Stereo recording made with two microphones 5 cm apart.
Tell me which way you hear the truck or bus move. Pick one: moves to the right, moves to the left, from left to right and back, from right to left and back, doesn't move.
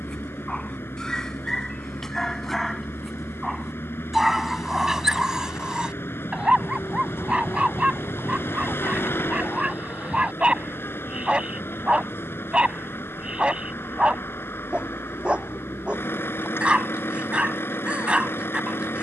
doesn't move.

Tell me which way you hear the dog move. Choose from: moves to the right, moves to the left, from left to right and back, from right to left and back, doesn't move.
moves to the right.